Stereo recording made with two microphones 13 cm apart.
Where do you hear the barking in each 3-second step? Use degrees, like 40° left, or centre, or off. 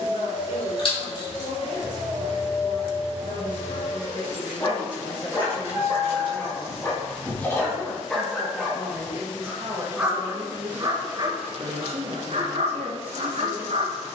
30° left, 30° left, 10° left, 30° right, 60° right.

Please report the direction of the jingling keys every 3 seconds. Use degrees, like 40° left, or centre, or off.
30° left, 10° right, centre, off, off.